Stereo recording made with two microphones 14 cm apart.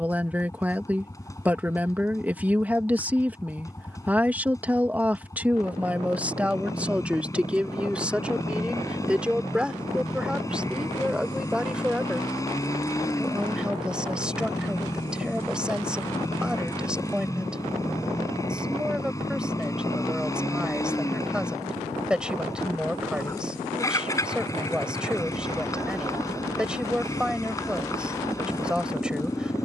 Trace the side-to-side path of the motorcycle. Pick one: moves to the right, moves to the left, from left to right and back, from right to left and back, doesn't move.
doesn't move.